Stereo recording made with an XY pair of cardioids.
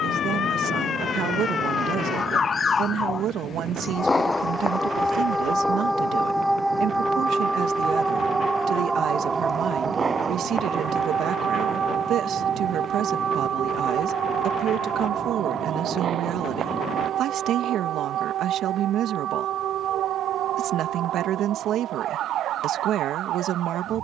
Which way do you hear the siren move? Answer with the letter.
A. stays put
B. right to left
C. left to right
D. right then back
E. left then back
C.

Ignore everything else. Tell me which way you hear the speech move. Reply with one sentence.
In this clip you hear the speech stay put.